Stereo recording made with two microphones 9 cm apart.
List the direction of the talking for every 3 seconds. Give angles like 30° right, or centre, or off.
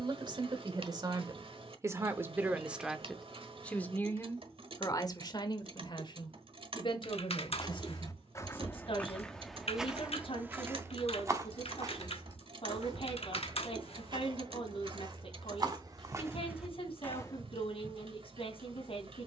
30° right, 30° left, 60° left, 70° left, 70° left, 70° left, 70° left.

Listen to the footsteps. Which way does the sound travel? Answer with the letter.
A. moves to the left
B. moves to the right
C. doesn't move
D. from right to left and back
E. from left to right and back
E.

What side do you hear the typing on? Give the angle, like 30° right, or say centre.
80° left.